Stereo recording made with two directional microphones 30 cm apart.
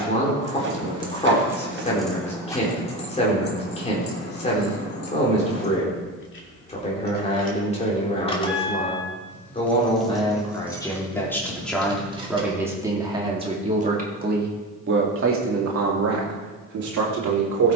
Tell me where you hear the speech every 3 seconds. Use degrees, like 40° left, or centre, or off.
20° left, 20° left, 20° left, 10° left, 20° right, 50° right.